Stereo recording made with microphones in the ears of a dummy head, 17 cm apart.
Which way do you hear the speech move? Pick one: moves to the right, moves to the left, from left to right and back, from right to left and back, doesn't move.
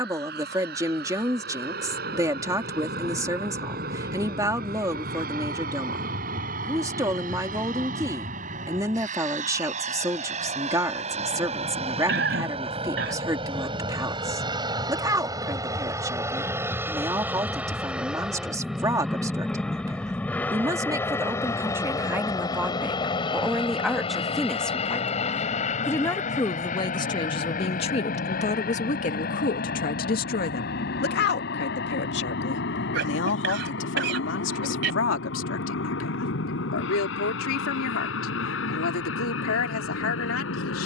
moves to the left.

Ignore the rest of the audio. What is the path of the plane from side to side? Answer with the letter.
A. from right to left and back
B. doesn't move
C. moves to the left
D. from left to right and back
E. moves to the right
C.